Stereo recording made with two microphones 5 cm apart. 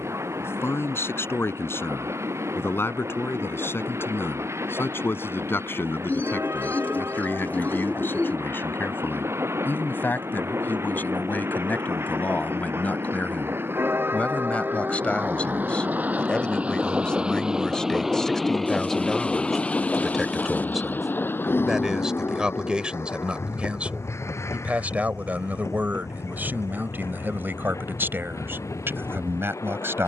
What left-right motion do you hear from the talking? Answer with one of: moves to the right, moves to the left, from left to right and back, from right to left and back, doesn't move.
moves to the right.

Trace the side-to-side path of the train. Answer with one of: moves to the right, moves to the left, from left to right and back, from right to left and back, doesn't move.
moves to the left.